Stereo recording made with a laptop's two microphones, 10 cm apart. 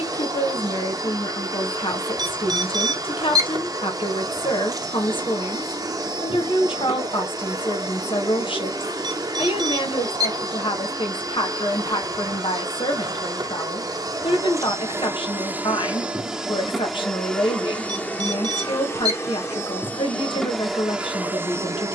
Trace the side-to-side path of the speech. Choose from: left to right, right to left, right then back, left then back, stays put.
stays put.